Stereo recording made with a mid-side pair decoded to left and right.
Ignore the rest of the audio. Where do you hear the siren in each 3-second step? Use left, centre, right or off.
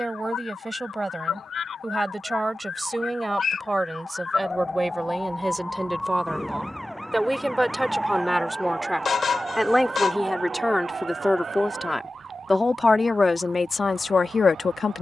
left, left, centre, right, right.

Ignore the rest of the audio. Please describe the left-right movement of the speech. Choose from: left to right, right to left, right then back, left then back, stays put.
right to left.